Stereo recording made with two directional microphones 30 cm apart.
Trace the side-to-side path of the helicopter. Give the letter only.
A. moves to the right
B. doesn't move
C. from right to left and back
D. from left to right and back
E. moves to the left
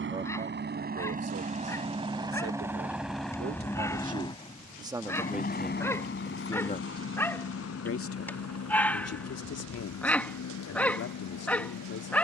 E.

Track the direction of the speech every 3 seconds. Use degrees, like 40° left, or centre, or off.
40° right, 20° right, 40° left, 50° left.